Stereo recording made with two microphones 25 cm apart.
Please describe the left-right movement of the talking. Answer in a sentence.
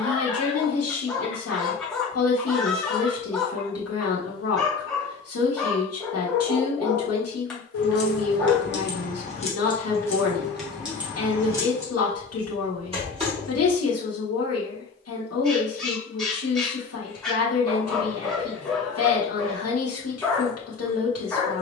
In this clip you hear the talking stay in one place.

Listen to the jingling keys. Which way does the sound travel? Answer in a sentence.
You can hear the jingling keys travel towards the right.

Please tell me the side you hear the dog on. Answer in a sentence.
You can hear the dog in the centre.